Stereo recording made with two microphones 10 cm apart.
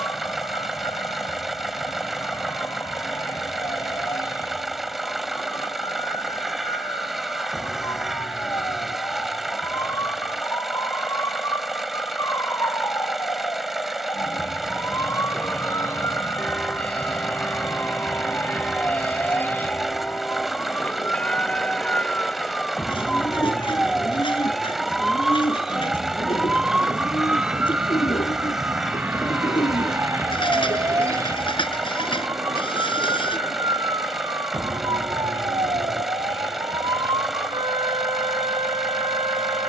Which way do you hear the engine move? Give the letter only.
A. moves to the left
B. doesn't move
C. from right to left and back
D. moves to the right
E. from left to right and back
B.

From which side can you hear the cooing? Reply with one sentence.
In this clip you hear the cooing on the left.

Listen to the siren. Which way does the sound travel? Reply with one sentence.
In this clip you hear the siren move from left to right.